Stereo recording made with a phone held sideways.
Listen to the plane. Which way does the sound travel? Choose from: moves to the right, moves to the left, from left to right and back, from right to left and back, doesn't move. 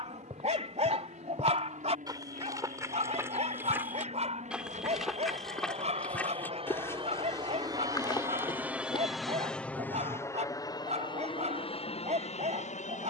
moves to the left.